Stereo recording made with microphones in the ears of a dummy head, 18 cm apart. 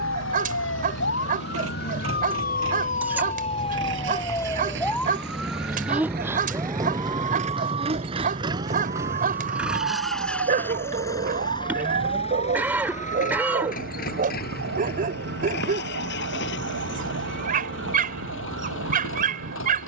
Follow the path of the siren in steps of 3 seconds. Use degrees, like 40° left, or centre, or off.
50° left, 10° left, 20° right, 40° right, 50° right, 50° right, 60° right.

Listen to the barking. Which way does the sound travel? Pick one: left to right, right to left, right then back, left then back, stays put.
stays put.